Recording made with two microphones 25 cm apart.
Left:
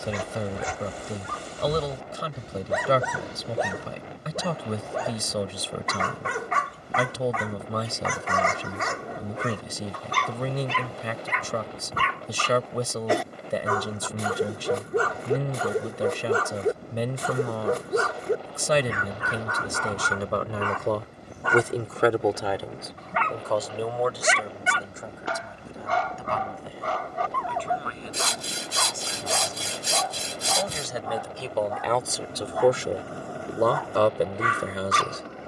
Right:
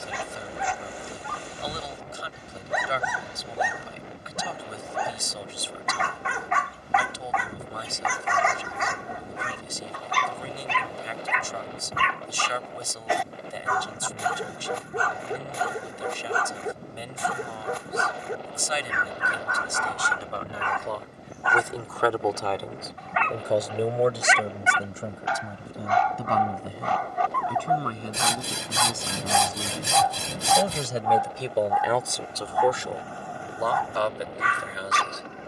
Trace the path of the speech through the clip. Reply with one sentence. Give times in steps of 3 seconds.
You can hear the speech on the left from 0 s, in the centre from 21 s, on the right from 24 s, in the centre from 30 s and on the left from 33 s.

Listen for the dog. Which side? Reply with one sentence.
In this clip you hear the dog on the left.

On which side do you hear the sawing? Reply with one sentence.
You can hear the sawing on the right.